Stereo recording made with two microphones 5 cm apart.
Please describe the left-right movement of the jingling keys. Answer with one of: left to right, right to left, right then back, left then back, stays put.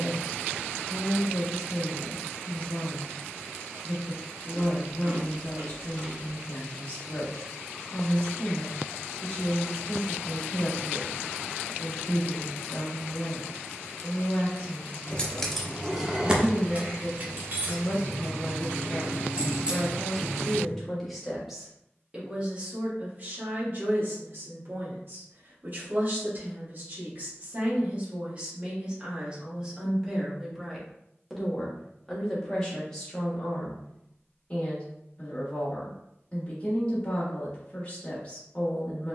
right then back.